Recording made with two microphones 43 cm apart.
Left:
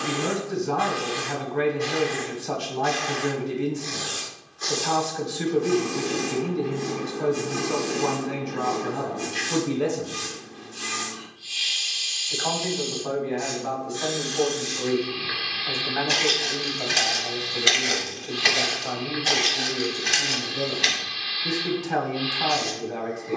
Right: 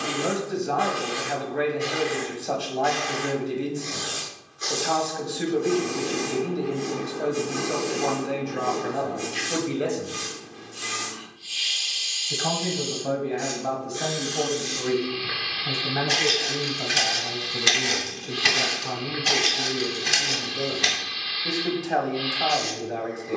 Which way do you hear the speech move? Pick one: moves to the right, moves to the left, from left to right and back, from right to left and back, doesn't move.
from left to right and back.